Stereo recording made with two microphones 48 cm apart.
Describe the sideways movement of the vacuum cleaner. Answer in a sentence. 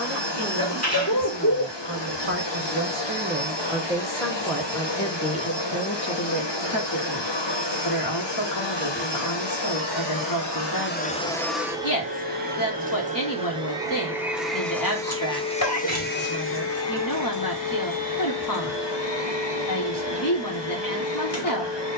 You can hear the vacuum cleaner move from left to right and back again.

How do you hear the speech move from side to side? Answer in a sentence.
In this clip you hear the speech travel towards the left.